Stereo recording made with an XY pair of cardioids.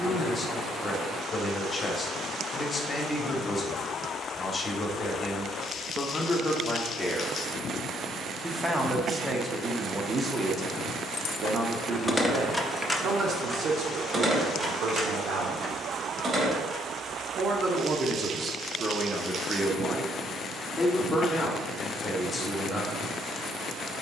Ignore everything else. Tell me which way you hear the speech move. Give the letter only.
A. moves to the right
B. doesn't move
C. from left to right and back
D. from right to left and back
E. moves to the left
C.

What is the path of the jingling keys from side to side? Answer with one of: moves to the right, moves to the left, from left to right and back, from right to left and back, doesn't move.
moves to the right.